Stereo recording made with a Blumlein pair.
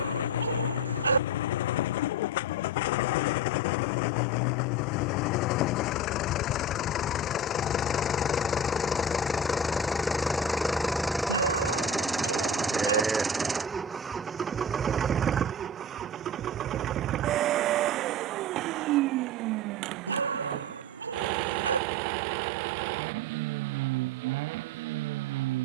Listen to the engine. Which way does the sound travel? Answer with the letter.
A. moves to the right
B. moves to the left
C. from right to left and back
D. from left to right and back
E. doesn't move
A.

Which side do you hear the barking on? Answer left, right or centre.
right.